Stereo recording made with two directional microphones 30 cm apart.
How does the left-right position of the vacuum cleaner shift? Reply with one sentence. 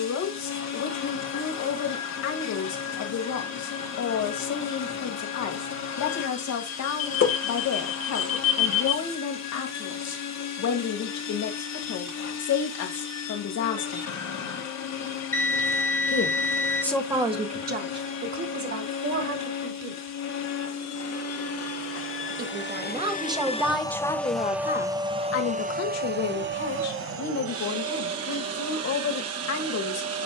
You can hear the vacuum cleaner go from the left side to the right.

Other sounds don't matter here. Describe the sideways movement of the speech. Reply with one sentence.
You can hear the speech move from left to right and back again.